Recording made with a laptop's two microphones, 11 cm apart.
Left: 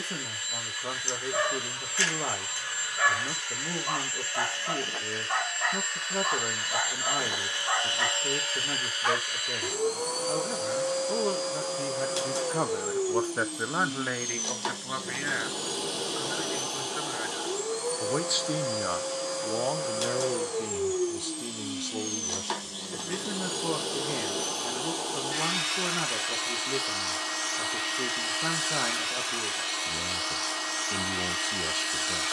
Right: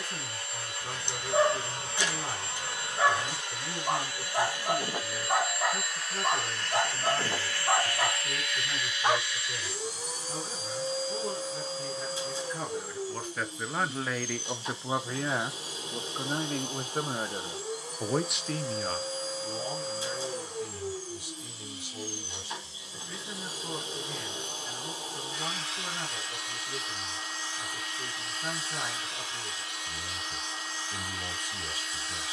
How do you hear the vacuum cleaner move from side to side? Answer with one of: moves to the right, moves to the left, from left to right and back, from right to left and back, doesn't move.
moves to the left.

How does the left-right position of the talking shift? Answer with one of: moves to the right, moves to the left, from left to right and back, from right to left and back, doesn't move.
from left to right and back.